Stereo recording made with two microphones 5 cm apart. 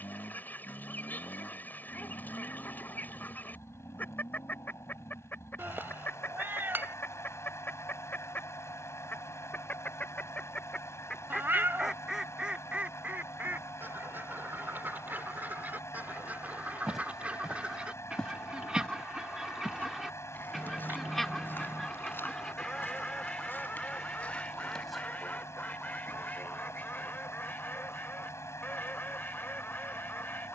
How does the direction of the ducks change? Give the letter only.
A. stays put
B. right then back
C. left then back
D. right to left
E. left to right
B.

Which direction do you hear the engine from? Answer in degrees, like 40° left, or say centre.
80° left.